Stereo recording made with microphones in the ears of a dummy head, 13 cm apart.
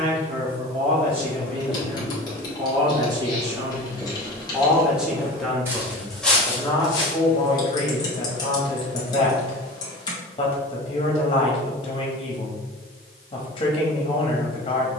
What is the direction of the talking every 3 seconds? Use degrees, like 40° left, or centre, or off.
40° right, 10° right, 30° left, 30° left, 30° left.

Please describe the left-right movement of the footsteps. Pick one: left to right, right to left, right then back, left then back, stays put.
right then back.